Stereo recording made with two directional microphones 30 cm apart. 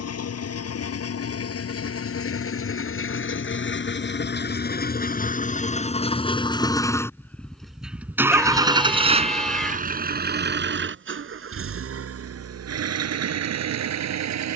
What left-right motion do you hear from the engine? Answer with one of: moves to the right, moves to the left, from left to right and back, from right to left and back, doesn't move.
moves to the right.